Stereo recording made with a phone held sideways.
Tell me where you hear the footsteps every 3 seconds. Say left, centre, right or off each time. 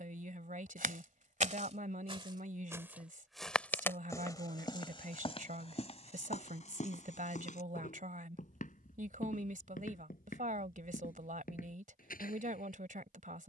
right, left, left, left, left.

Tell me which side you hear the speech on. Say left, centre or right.
right.